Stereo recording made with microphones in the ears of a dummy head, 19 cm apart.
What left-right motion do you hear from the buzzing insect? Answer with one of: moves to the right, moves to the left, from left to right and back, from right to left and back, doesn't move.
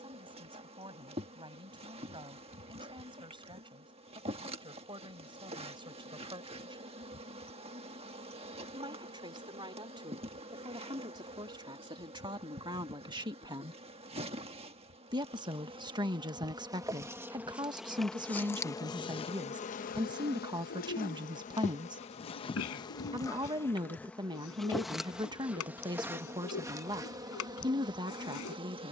from right to left and back.